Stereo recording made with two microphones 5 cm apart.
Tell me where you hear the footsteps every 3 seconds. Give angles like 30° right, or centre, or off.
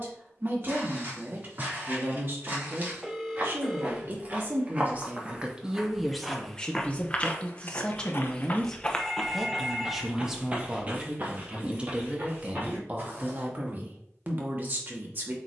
40° right, 30° right, 20° left, 20° right, 40° right.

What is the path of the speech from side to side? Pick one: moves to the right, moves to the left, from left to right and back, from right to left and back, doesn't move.
from right to left and back.